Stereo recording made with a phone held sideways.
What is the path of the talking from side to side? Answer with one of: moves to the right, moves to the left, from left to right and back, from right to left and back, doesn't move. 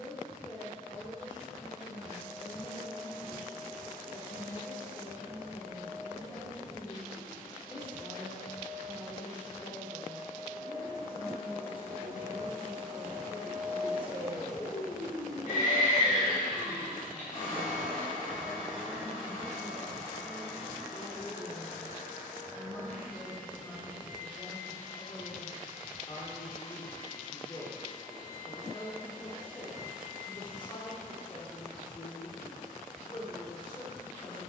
doesn't move.